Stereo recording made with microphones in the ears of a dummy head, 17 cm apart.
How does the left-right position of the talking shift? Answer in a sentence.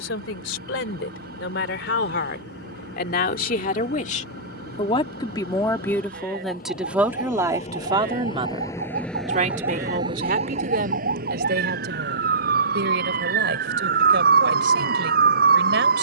In this clip you hear the talking move from left to right.